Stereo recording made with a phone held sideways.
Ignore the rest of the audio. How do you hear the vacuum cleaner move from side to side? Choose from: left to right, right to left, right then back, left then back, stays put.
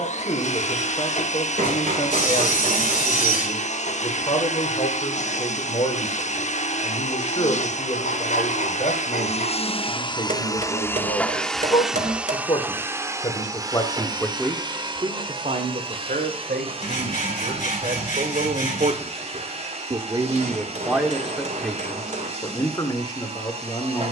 left to right.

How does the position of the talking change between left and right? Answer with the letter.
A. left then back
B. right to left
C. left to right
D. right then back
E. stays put
D.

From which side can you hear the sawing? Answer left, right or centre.
left.